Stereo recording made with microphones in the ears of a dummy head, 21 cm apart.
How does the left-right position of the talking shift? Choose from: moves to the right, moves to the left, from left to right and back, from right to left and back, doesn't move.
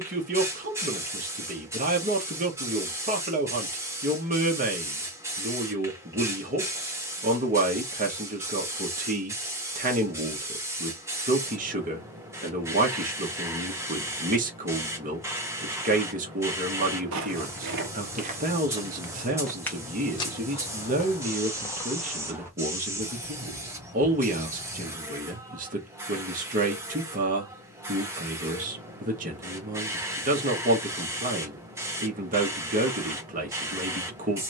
doesn't move.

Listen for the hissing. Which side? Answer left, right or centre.
centre.